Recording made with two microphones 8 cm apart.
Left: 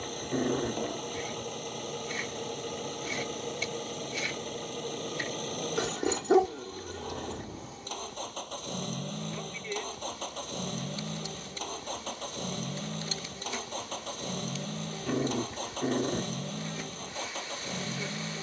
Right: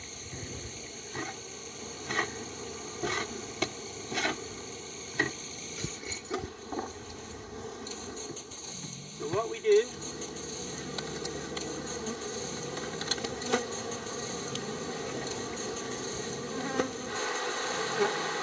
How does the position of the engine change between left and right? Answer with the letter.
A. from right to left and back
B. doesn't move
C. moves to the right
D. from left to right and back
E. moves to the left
B.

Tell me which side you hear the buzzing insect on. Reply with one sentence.
In this clip you hear the buzzing insect on the right.